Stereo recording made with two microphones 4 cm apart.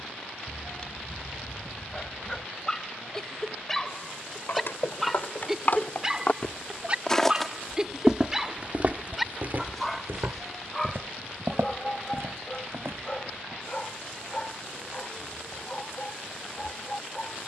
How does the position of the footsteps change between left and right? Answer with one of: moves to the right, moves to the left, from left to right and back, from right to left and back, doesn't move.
moves to the right.